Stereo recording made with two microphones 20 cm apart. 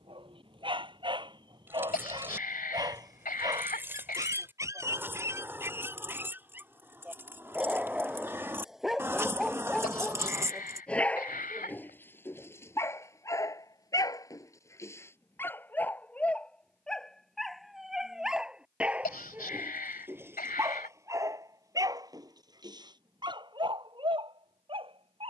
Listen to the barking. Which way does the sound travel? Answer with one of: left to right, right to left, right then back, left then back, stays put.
left then back.